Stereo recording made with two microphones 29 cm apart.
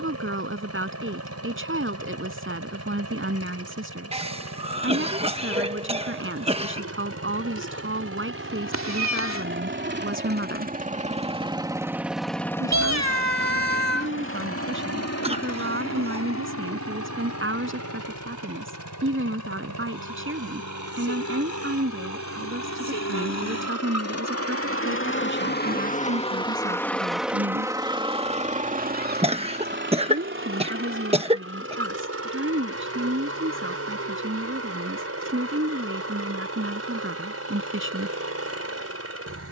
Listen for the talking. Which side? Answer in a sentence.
You can hear the talking on the right.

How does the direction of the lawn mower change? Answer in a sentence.
In this clip you hear the lawn mower go left and come back.